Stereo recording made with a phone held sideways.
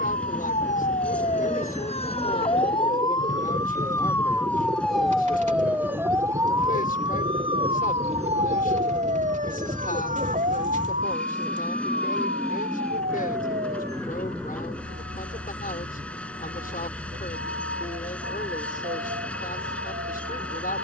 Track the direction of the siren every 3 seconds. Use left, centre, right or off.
left, centre, right, right, right, right, right.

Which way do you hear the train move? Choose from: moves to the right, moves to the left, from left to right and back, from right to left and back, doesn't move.
doesn't move.